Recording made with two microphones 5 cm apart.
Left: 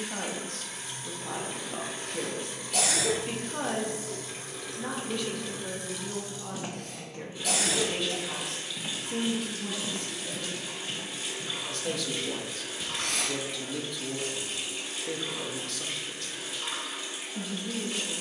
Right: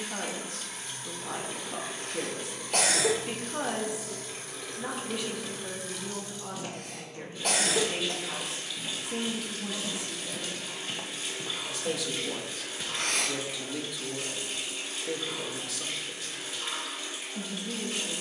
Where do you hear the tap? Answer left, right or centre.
centre.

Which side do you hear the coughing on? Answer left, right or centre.
right.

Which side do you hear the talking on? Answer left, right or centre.
centre.